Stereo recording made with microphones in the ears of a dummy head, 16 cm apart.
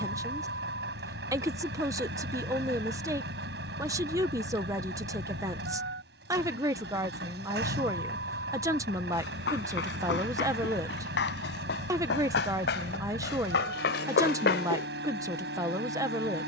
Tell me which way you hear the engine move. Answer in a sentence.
In this clip you hear the engine stay put.